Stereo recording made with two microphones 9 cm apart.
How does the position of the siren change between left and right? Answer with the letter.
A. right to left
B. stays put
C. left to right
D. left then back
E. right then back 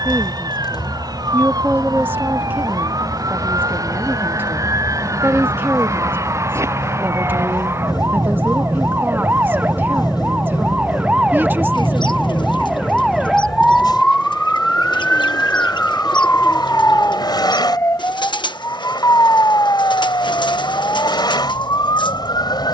A.